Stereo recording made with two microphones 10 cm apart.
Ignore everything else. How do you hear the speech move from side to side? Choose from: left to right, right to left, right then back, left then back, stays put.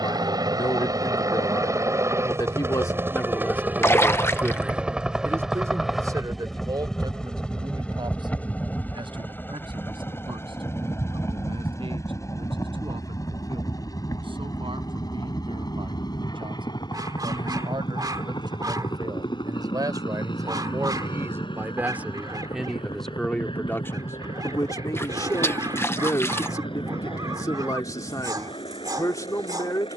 right then back.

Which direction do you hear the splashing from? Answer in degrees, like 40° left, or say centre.
20° left.